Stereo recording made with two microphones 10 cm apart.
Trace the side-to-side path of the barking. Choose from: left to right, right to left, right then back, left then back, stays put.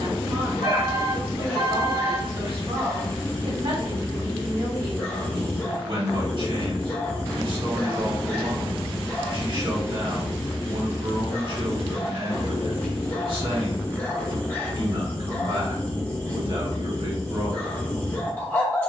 stays put.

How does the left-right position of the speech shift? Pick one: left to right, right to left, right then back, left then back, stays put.
stays put.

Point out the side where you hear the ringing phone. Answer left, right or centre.
right.